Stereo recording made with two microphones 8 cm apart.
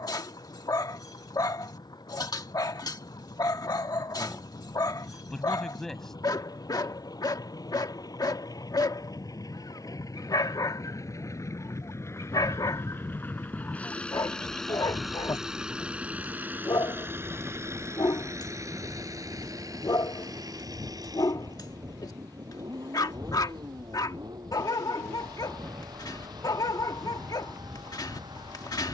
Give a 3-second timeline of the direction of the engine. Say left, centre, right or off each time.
left, left, left, left, left, right, right, right, right, right.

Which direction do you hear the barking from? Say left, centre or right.
left.